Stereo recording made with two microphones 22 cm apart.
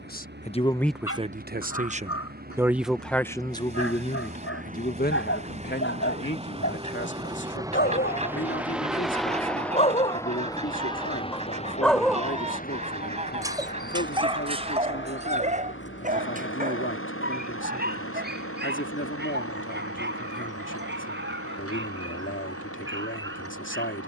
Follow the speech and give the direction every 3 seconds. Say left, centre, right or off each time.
centre, left, left, left, left, left, left, left.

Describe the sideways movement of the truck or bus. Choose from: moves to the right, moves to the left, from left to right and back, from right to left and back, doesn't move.
moves to the left.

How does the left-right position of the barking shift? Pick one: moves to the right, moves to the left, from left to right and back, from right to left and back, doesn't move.
moves to the right.